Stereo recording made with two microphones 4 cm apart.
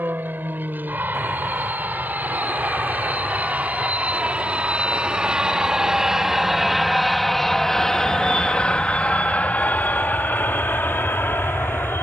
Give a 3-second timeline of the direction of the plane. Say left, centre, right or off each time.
right, right, centre, left.